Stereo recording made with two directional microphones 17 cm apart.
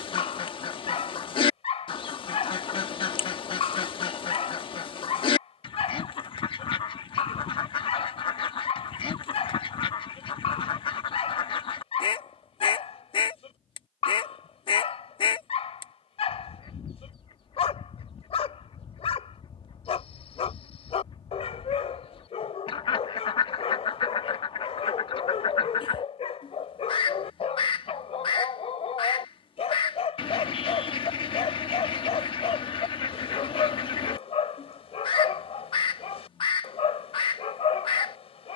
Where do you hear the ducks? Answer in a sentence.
You can hear the ducks on the left.